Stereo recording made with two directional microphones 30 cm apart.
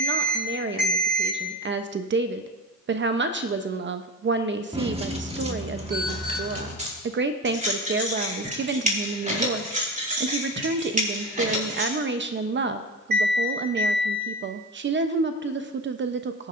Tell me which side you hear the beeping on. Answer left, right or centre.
right.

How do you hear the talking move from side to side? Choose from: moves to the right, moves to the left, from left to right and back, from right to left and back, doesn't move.
doesn't move.